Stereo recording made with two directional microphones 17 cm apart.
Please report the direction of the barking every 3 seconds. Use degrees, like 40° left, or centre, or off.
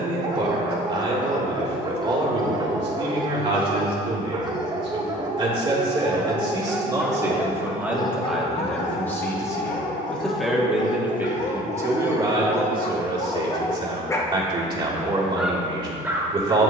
20° right, 20° right, 10° left, 50° left, 30° left, 10° right.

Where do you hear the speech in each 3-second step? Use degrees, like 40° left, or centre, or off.
30° right, 30° right, 10° right, centre, 30° right, 30° right.